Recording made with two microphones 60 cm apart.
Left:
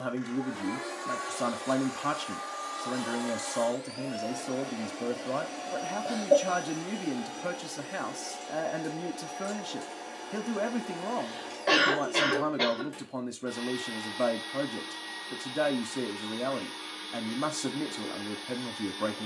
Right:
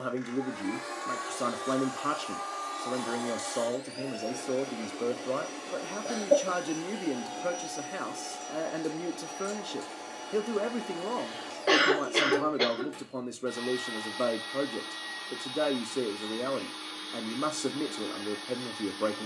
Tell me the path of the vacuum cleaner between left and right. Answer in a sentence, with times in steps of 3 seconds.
In this clip you hear the vacuum cleaner on the left from 0 s and in the centre from 6 s.